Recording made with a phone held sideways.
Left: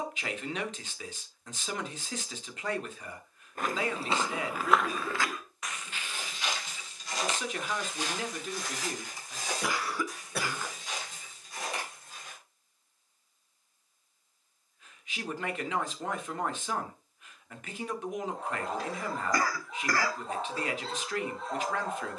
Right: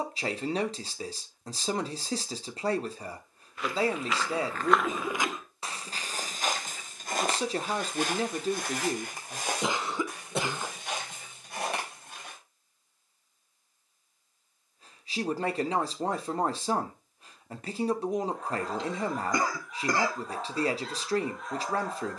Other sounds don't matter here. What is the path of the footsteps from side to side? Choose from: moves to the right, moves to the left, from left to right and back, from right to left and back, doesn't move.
moves to the right.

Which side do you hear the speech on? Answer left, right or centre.
right.